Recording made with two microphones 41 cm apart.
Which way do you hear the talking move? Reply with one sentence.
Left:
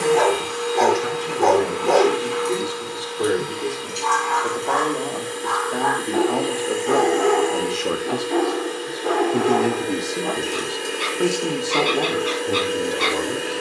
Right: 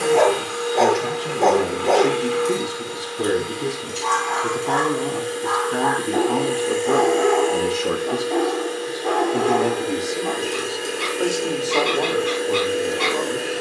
You can hear the talking travel towards the left.